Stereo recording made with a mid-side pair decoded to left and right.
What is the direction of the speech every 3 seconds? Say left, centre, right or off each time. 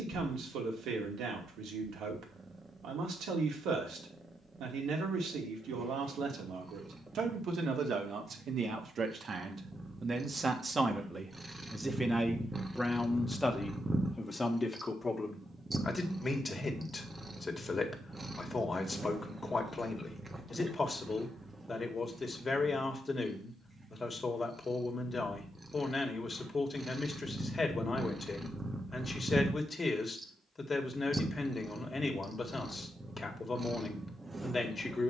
right, right, right, right, centre, left, left, left, left, left, left, left.